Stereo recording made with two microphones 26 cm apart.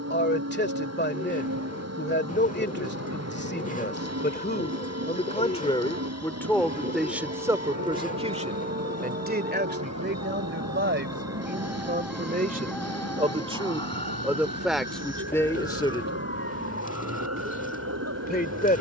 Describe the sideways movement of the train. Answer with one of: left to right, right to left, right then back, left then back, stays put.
stays put.